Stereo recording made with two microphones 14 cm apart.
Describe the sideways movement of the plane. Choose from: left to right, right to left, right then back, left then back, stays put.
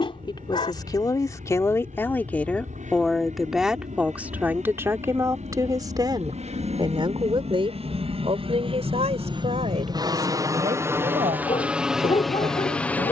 right to left.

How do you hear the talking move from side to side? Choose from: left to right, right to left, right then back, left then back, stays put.
left to right.